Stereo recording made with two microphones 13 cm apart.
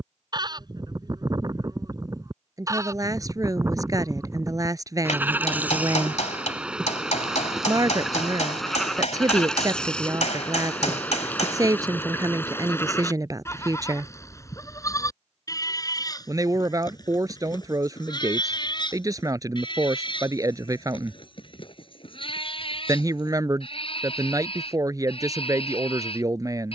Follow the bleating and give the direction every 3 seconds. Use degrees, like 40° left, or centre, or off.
30° right, 20° right, centre, 10° left, 20° left, 30° left, 40° left, 40° left, 50° left.